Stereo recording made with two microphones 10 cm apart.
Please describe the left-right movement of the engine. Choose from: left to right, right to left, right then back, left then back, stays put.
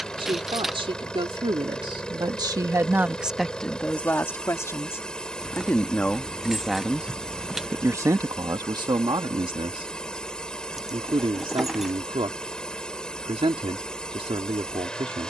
stays put.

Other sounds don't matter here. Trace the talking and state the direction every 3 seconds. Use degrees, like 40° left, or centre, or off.
70° right, 20° left, 20° right, 70° right, 80° right.